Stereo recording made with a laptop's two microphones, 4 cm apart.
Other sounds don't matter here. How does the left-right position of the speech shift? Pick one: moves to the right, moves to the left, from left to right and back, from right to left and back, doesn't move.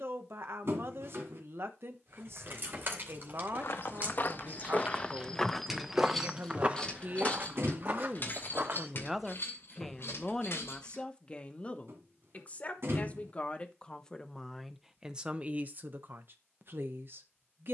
from right to left and back.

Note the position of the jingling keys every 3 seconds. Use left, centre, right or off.
right, right, left, left, off, off.